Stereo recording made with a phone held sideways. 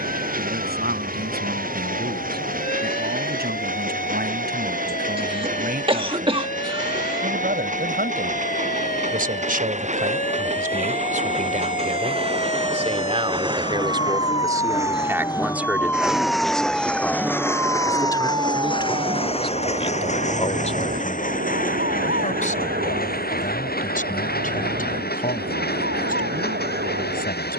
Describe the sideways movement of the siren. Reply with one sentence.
You can hear the siren go from the left side to the right.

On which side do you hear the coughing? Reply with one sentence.
In this clip you hear the coughing on the right.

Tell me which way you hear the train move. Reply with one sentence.
In this clip you hear the train travel towards the left.